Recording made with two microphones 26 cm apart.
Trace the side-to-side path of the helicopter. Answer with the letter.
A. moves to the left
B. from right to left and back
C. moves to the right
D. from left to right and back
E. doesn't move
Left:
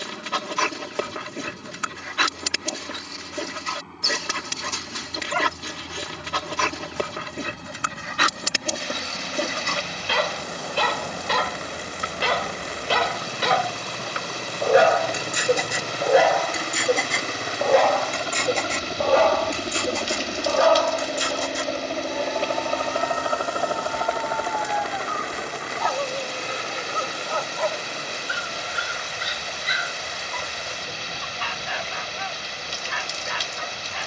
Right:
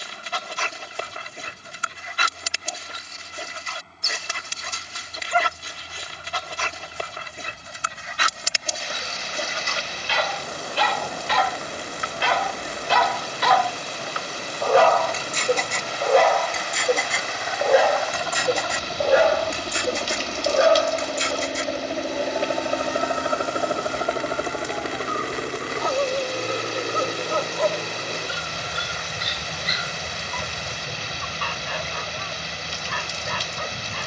C.